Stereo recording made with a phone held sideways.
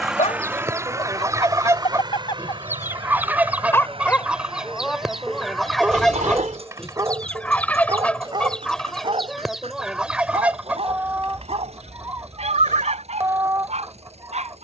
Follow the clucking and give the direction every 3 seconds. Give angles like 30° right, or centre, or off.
20° right, 10° right, 10° left, 10° right, 20° right.